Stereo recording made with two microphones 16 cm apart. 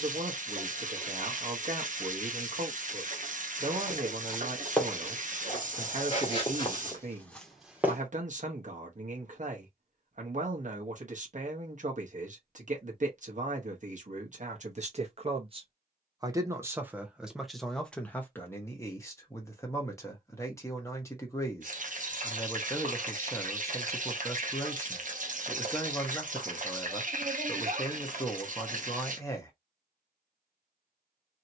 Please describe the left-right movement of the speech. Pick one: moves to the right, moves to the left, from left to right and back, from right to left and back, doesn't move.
moves to the left.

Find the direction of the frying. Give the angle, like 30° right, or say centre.
50° right.